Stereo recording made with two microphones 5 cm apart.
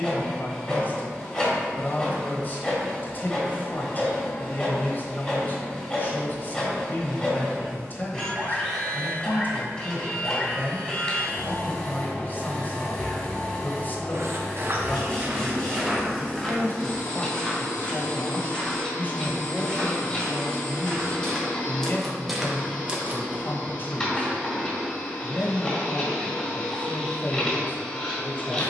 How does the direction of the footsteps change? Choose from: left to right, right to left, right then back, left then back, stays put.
left then back.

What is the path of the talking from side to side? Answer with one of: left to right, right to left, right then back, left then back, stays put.
stays put.